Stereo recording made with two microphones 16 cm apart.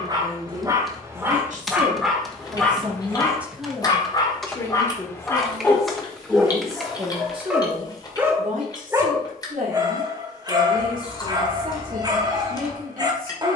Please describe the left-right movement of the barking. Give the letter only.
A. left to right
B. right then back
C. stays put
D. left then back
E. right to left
D.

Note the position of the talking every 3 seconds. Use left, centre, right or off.
right, centre, right, right, right.